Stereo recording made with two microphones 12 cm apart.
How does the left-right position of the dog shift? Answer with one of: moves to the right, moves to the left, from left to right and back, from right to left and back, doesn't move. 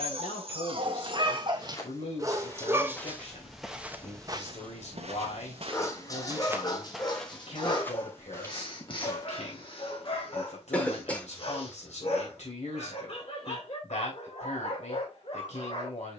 moves to the left.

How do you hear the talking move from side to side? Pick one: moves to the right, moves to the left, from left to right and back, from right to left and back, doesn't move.
doesn't move.